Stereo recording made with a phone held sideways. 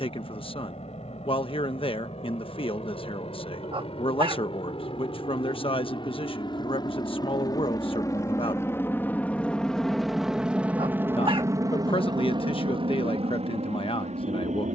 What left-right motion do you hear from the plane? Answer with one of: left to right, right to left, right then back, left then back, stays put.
left to right.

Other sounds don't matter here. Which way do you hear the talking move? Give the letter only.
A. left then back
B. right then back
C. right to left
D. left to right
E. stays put
E.